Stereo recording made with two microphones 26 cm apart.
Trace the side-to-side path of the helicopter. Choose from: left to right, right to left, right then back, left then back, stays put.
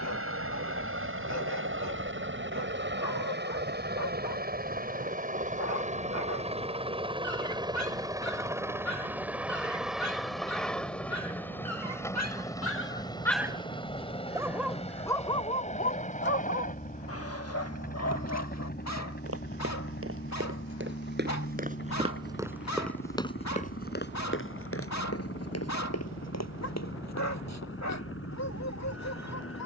right to left.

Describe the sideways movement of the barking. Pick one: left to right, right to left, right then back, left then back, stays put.
right then back.